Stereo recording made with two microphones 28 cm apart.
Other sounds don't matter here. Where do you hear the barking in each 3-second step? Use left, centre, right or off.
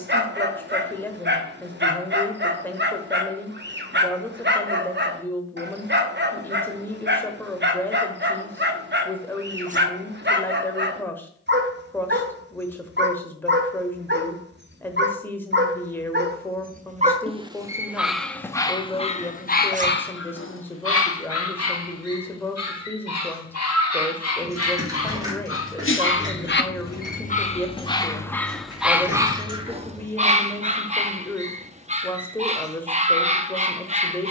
right, right, right, right, right, right, left, left, left, centre, right, right.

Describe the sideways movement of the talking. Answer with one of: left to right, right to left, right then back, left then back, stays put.
stays put.